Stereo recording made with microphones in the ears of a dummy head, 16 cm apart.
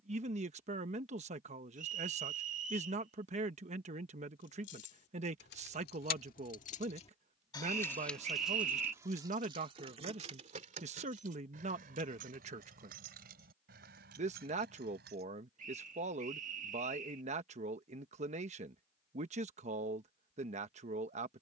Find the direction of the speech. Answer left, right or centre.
right.